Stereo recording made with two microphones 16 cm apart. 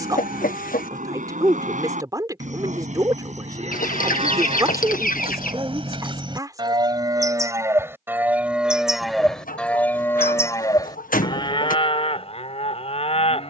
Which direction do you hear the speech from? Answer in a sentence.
In this clip you hear the speech on the right.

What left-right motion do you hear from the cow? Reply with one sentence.
In this clip you hear the cow travel towards the left.